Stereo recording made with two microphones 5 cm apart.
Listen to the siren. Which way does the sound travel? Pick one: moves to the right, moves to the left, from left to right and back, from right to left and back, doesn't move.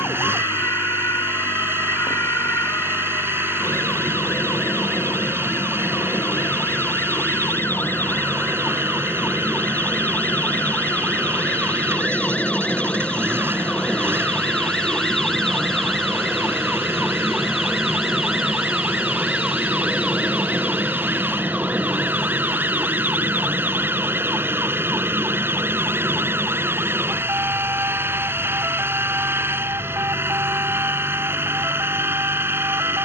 moves to the right.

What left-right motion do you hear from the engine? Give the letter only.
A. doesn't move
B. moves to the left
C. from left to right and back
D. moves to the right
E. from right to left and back
A.